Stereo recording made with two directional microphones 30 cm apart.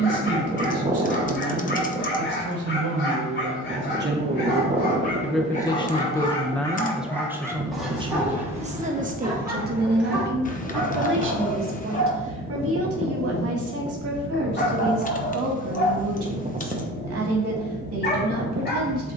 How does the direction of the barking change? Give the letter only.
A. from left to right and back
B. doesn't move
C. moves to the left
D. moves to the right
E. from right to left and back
A.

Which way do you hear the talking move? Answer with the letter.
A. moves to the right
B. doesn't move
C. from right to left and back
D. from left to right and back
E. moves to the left
C.